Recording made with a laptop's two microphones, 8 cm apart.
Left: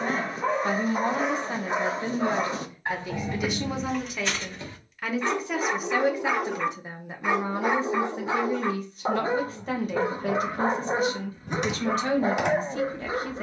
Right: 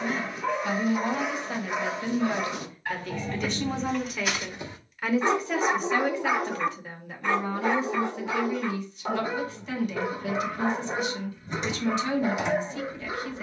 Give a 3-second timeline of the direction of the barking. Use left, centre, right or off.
left, centre, centre, left, left.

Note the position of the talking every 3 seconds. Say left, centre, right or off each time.
left, centre, left, left, left.